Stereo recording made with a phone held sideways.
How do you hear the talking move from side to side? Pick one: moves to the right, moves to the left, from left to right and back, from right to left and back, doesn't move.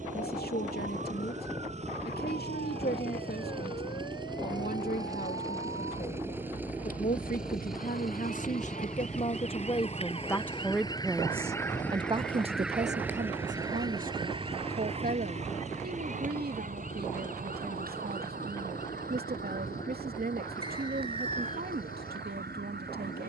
moves to the right.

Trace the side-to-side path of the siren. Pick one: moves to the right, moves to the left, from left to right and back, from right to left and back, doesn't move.
moves to the right.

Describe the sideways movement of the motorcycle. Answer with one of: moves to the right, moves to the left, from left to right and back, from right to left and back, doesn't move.
moves to the left.